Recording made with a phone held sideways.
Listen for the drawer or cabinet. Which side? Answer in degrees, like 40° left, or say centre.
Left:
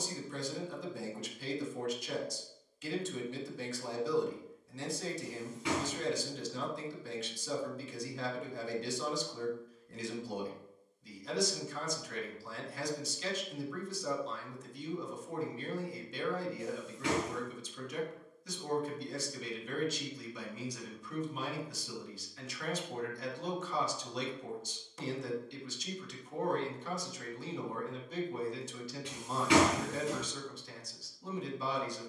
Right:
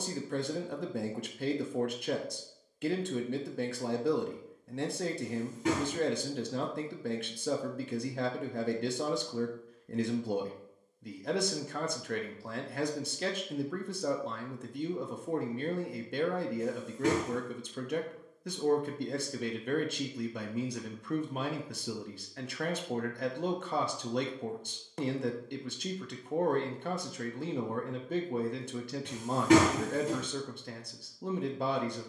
40° right.